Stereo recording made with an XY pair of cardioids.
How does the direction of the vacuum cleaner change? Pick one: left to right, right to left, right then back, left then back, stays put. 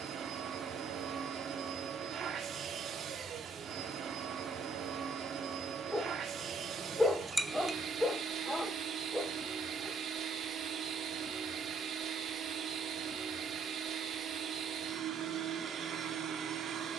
stays put.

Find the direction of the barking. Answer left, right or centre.
centre.